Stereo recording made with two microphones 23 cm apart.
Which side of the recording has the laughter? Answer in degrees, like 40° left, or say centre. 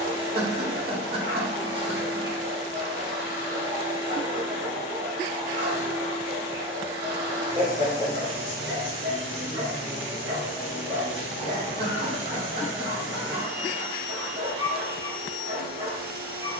40° right.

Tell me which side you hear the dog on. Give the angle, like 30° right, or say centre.
50° right.